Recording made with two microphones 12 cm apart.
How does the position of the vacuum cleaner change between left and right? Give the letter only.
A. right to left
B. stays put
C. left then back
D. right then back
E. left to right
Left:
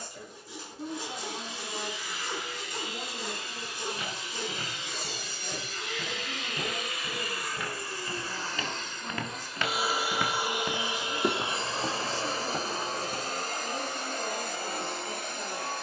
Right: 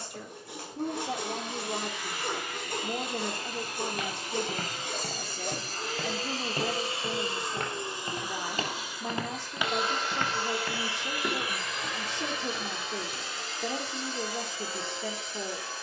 A.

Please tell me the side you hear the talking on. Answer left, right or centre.
right.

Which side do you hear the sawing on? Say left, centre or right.
right.